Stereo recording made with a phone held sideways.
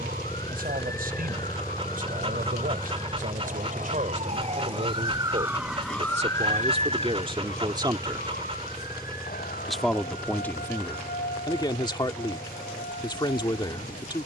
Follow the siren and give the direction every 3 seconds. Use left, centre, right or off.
right, right, left, left, left.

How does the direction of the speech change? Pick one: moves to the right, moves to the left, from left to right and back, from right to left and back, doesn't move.
moves to the left.